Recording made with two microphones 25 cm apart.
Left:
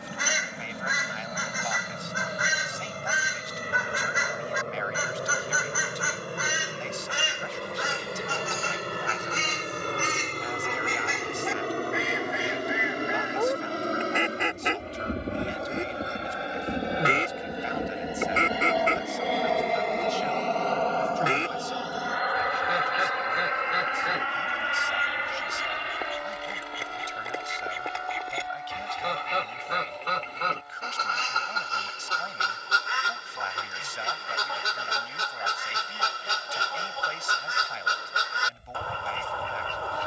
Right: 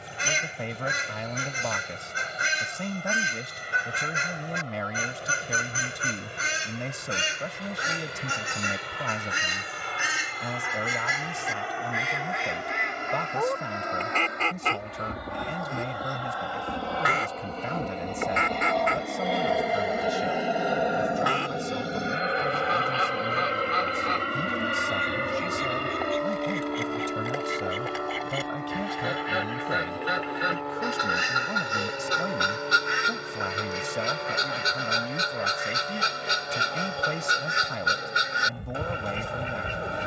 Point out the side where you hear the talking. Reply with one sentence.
You can hear the talking on the right.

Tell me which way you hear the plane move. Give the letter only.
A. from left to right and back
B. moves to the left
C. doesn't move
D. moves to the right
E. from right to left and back
D.